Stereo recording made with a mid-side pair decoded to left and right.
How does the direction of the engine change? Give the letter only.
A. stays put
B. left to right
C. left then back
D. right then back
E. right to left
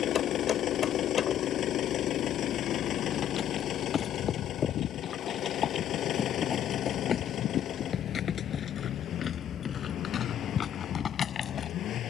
A.